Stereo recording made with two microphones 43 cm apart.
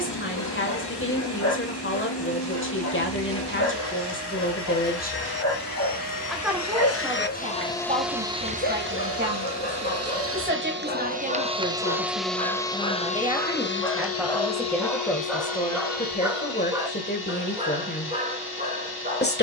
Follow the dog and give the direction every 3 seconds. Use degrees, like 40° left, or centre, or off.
40° left, 40° left, 30° left, 20° left, 10° left, 10° right, 20° right.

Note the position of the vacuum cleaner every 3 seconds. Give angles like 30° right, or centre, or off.
60° left, 60° left, 10° left, 30° right, 20° left, 50° left, 60° left.